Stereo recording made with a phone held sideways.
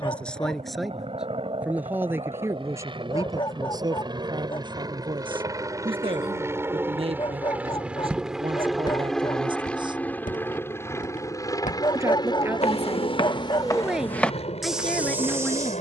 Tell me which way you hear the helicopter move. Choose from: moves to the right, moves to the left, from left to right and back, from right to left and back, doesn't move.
moves to the left.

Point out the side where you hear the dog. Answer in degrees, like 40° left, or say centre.
30° left.